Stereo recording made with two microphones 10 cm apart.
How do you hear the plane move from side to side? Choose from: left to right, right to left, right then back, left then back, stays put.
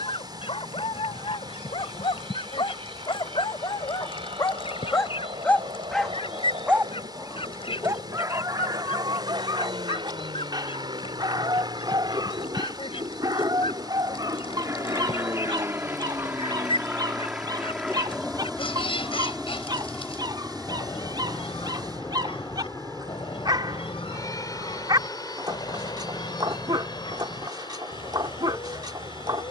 right to left.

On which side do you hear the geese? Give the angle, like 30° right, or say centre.
70° left.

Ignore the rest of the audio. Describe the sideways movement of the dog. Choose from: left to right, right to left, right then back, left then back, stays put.
left to right.